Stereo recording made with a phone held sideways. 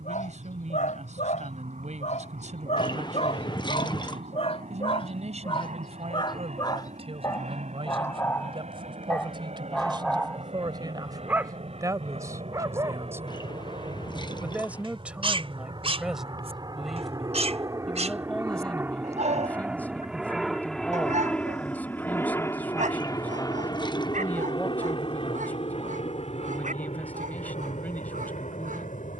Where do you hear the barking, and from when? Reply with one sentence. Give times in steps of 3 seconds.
In this clip you hear the barking on the left from 0 s, in the centre from 9 s and on the right from 12 s.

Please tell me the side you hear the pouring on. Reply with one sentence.
In this clip you hear the pouring on the left.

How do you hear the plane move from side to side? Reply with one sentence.
In this clip you hear the plane move from right to left.